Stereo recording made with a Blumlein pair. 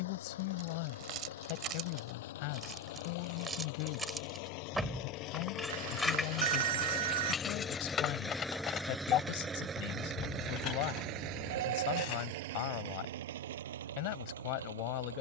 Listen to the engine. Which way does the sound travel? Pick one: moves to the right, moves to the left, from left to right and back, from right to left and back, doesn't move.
moves to the right.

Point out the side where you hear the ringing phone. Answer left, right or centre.
right.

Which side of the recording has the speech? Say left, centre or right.
left.